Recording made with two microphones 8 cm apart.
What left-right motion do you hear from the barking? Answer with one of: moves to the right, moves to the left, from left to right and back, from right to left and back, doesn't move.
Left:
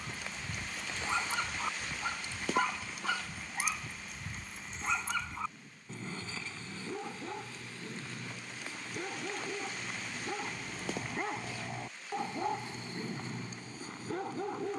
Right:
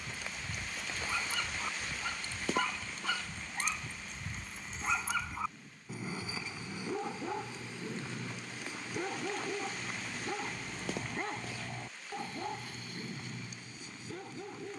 from left to right and back.